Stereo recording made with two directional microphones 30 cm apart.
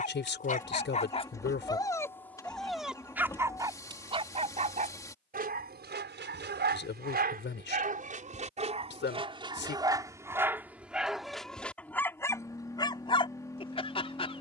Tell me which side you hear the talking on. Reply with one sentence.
In this clip you hear the talking on the left.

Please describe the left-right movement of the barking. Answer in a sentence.
You can hear the barking move from left to right and back again.